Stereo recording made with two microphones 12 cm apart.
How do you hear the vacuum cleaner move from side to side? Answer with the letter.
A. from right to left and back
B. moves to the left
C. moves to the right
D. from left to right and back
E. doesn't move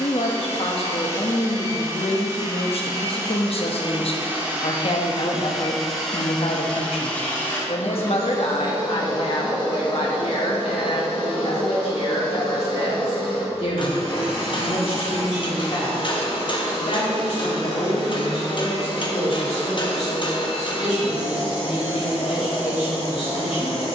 B.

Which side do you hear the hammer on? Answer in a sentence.
In this clip you hear the hammer on the left.